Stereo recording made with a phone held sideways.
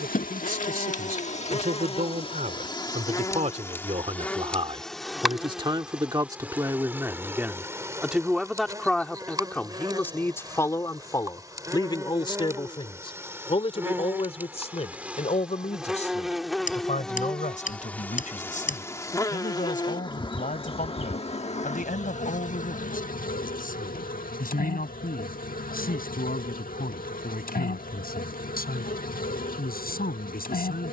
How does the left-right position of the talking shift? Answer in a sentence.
In this clip you hear the talking travel towards the left.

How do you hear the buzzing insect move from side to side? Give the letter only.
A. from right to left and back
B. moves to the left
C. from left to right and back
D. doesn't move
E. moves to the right
C.